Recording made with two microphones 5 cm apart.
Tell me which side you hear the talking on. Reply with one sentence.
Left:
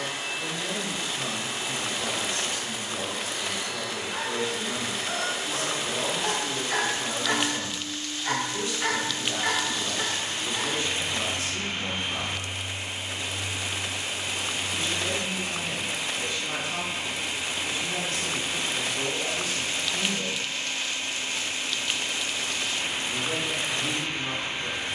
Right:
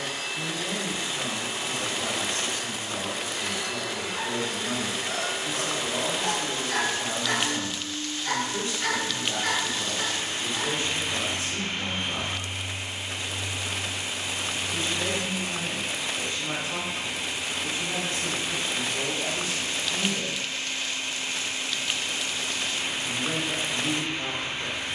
In this clip you hear the talking on the right.